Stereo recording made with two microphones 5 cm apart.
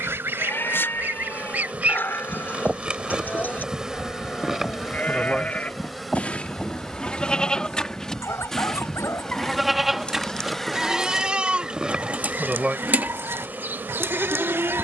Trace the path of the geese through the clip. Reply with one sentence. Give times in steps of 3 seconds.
In this clip you hear the geese on the right from 0 s, in the centre from 3 s, on the left from 6 s, in the centre from 9 s and on the right from 12 s.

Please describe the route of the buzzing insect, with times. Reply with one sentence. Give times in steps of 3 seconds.
You can hear the buzzing insect on the right from 0 s, in the centre from 3 s and on the right from 12 s.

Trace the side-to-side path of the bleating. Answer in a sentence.
You can hear the bleating travel towards the right.